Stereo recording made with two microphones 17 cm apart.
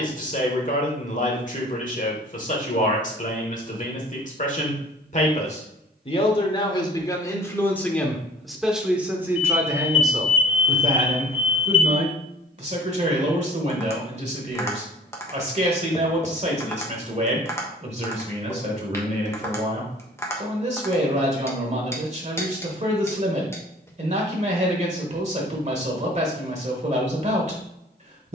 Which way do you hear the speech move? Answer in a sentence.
You can hear the speech move to the right.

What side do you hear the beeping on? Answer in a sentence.
You can hear the beeping on the right.